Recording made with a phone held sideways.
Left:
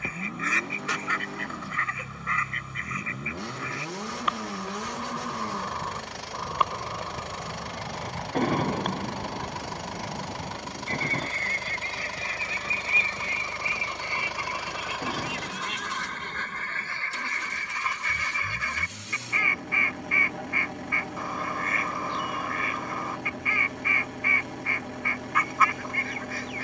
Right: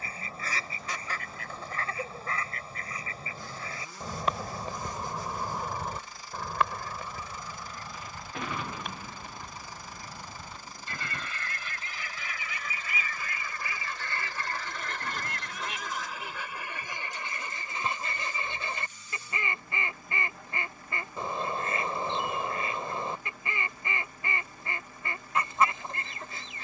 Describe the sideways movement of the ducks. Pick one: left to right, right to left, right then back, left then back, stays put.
left then back.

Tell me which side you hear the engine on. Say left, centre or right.
left.